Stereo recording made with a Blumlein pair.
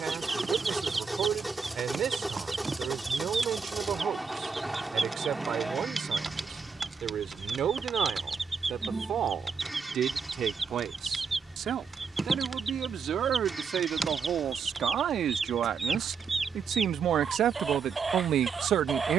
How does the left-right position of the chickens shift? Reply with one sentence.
You can hear the chickens stay put.